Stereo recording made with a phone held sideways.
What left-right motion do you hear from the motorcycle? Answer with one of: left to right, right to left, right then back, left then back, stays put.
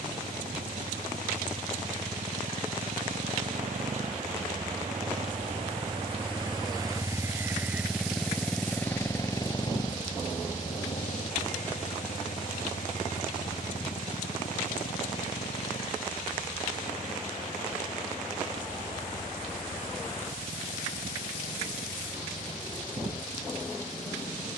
right to left.